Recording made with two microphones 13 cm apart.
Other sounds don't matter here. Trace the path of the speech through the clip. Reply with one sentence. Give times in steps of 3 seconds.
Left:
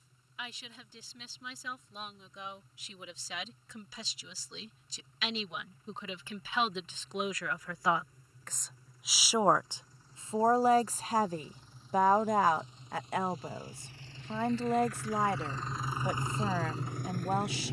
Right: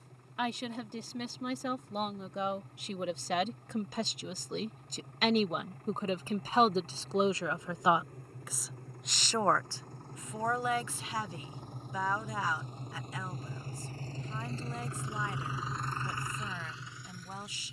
In this clip you hear the speech on the right from 0 s and on the left from 9 s.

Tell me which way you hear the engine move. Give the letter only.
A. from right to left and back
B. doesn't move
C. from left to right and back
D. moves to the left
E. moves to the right
D.